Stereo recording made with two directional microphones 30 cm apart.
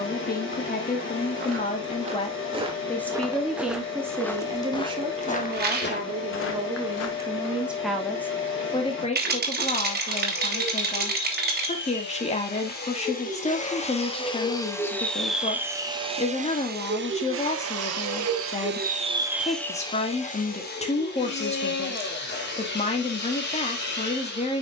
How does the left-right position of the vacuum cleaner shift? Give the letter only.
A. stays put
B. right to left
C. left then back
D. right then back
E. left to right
D.